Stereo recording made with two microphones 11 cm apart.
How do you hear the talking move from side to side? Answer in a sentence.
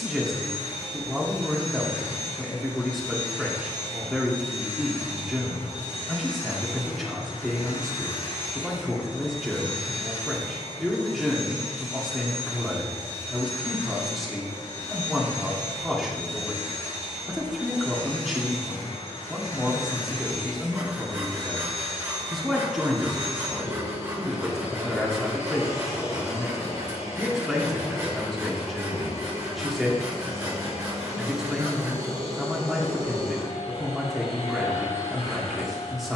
In this clip you hear the talking stay put.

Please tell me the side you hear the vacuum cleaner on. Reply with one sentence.
In this clip you hear the vacuum cleaner on the left.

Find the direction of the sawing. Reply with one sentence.
In this clip you hear the sawing on the right.